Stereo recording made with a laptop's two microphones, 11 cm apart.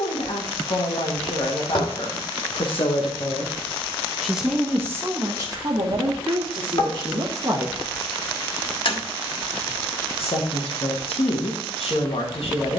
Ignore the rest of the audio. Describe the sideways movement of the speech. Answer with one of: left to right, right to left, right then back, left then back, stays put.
right then back.